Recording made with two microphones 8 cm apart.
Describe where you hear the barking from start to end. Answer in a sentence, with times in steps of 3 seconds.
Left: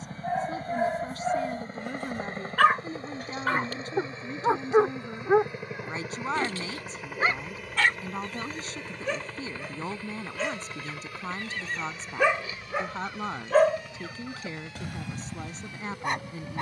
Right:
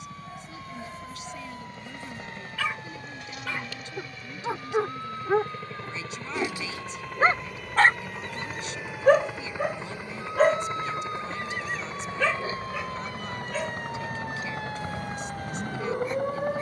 You can hear the barking on the left from 0 s, on the right from 6 s and on the left from 12 s.